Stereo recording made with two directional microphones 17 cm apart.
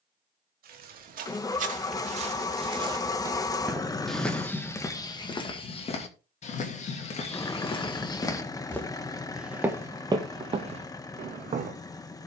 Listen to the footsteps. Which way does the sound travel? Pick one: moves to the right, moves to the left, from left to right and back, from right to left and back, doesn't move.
from right to left and back.